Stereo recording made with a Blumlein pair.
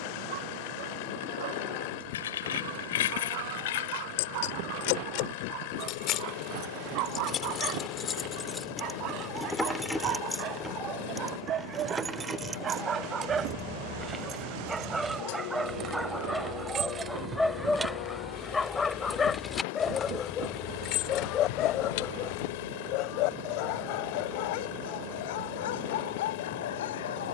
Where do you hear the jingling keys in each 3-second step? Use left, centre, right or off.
left, left, left, centre, right, right, centre, left, off.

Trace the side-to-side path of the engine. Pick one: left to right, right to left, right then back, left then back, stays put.
stays put.